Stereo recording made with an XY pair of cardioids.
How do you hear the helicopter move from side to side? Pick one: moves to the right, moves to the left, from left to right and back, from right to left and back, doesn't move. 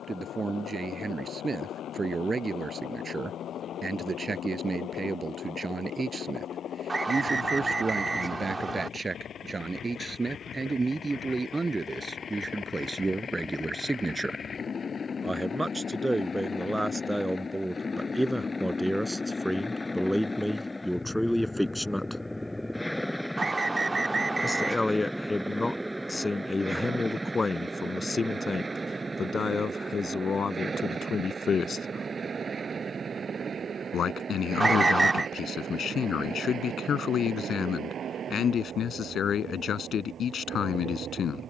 moves to the right.